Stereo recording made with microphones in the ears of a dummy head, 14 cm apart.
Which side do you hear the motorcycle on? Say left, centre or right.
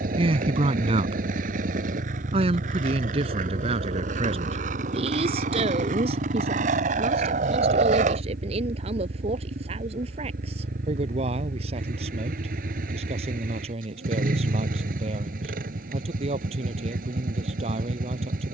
right.